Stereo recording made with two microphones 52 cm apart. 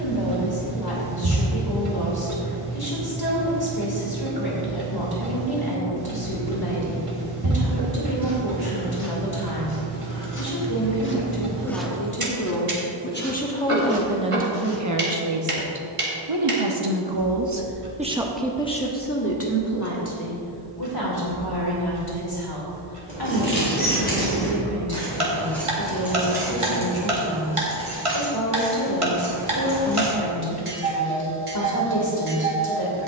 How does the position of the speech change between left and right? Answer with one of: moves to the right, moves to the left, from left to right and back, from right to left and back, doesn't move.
from left to right and back.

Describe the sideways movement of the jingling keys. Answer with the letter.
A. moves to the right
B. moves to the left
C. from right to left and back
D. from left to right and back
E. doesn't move
A.